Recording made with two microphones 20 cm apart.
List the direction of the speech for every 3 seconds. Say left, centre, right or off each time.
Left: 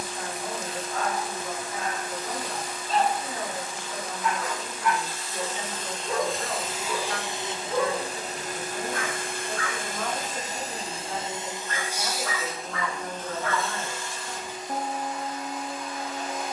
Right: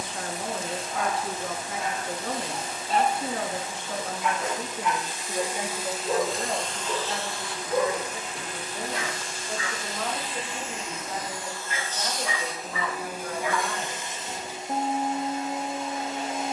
right, right, right, centre, centre, off.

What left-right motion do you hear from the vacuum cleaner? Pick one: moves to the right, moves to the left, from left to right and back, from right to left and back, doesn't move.
from right to left and back.